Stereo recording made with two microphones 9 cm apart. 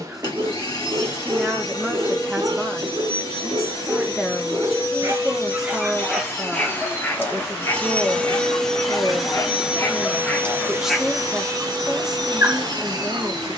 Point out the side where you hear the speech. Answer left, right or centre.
centre.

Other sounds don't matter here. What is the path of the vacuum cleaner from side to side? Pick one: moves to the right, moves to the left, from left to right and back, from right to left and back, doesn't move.
moves to the right.